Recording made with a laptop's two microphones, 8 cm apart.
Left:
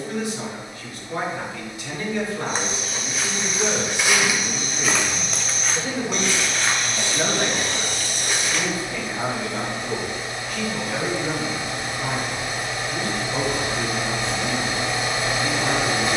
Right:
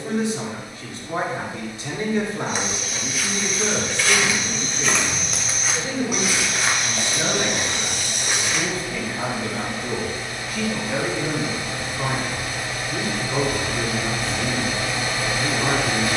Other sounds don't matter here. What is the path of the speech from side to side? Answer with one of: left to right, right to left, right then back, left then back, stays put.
left then back.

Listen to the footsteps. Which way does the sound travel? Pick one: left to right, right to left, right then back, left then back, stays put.
left to right.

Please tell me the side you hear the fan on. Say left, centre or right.
left.